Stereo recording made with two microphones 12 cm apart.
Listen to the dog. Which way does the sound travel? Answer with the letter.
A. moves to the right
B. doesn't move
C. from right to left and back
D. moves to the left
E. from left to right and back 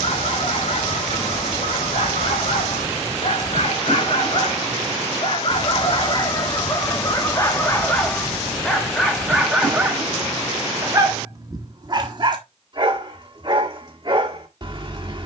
A.